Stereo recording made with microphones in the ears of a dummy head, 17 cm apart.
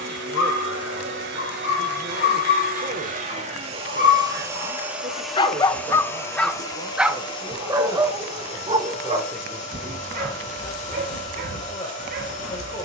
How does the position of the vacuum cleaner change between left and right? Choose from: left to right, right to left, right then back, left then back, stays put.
right to left.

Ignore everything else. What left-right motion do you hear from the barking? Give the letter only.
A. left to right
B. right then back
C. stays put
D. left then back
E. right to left
A.